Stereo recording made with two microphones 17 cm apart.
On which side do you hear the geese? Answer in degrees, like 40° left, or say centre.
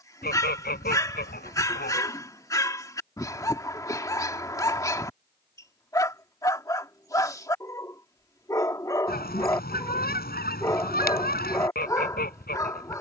60° left.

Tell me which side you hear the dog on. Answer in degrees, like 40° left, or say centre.
20° left.